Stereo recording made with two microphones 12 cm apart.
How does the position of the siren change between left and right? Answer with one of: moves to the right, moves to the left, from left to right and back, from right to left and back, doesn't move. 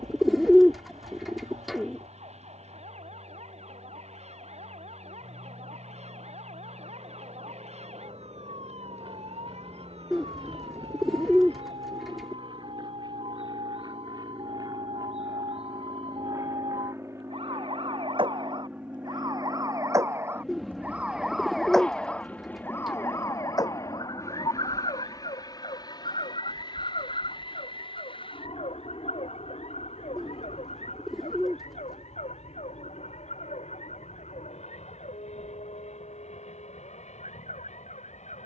moves to the left.